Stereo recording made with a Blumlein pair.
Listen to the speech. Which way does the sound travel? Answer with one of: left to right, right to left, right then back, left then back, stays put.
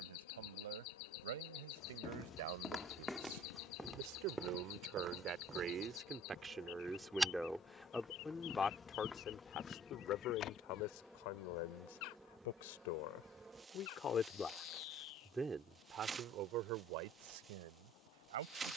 left then back.